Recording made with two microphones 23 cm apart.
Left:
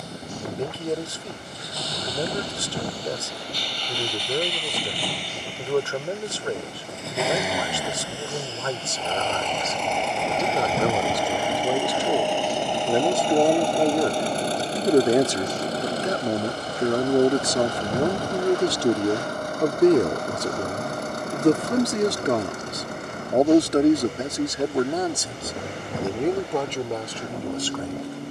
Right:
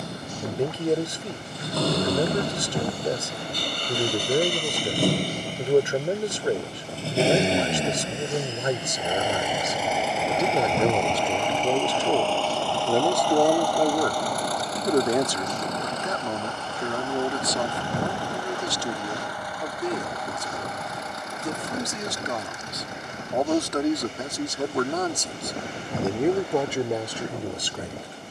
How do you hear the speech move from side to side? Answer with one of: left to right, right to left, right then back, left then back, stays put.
left then back.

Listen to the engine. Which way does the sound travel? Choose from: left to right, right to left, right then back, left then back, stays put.
right to left.